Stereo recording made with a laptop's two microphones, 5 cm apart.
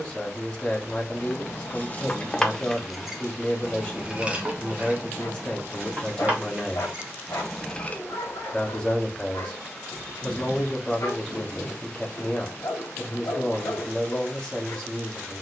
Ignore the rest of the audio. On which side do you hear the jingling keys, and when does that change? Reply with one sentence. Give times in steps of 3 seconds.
You can hear the jingling keys on the left from 0 s, on the right from 3 s, in the centre from 6 s and not at all from 9 s.